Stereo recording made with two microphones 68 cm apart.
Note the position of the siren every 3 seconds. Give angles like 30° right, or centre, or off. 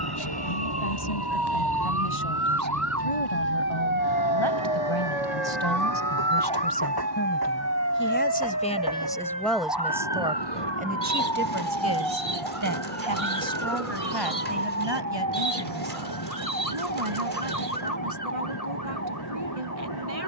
30° right, 10° right, 20° left, 40° left, 50° left, 60° left, 60° left.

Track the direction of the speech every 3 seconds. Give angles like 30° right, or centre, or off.
60° left, 40° left, 20° left, 10° right, 30° right, 50° right, 50° right.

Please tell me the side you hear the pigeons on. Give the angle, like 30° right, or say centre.
70° right.